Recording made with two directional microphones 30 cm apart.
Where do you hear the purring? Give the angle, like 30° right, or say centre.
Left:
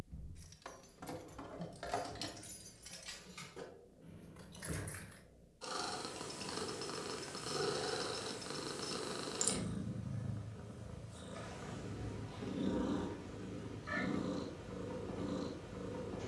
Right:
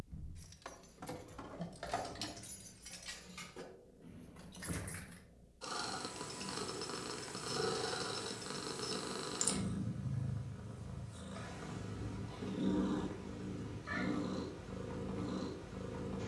centre.